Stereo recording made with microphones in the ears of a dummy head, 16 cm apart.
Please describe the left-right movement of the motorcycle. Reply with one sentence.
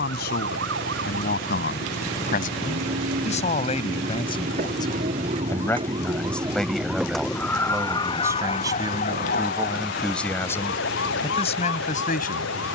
In this clip you hear the motorcycle go from the left side to the right.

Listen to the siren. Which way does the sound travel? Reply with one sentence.
You can hear the siren move to the left.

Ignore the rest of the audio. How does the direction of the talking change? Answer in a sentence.
In this clip you hear the talking move from left to right and back again.